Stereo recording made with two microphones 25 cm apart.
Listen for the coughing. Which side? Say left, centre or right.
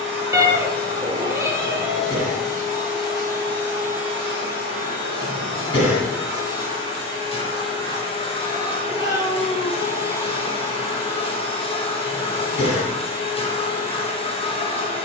left.